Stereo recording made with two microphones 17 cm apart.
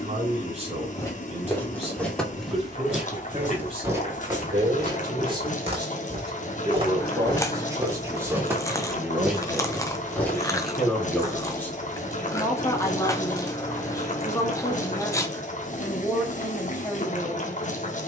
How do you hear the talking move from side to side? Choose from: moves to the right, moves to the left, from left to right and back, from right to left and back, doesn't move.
moves to the left.